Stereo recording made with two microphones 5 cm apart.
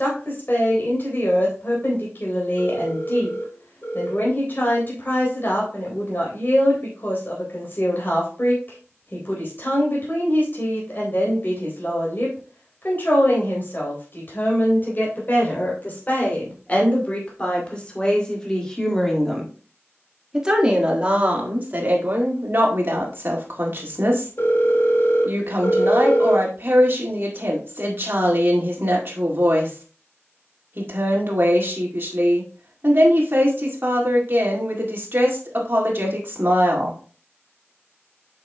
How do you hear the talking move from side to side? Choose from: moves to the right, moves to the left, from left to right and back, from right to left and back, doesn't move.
moves to the right.